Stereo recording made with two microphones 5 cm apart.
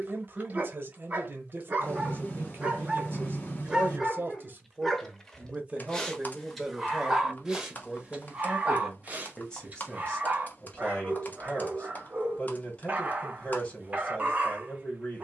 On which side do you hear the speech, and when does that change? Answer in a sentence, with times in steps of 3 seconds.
In this clip you hear the speech on the right from 0 s, in the centre from 6 s and on the left from 9 s.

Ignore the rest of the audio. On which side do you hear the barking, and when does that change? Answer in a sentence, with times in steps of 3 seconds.
You can hear the barking on the right from 0 s, in the centre from 3 s and on the right from 9 s.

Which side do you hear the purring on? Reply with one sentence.
In this clip you hear the purring on the left.